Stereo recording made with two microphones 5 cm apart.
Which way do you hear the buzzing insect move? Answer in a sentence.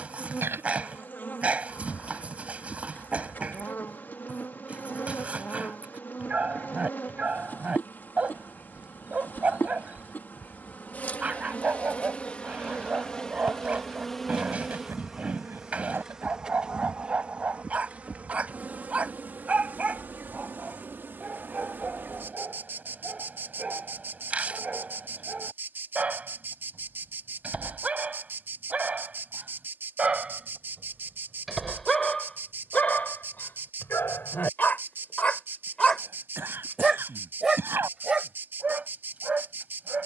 You can hear the buzzing insect move from left to right.